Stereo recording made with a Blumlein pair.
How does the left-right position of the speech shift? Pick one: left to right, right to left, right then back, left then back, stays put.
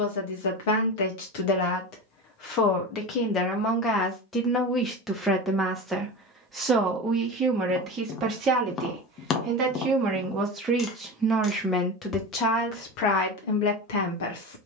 right then back.